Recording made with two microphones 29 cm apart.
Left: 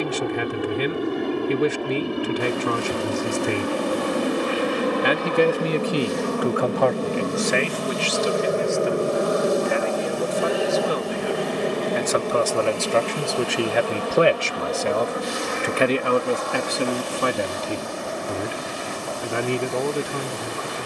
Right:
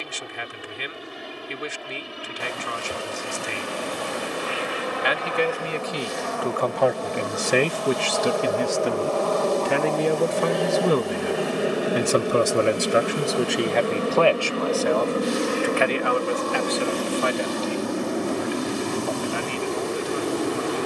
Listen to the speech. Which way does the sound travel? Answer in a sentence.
In this clip you hear the speech move from left to right and back again.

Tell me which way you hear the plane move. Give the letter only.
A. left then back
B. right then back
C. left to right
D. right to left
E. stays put
C.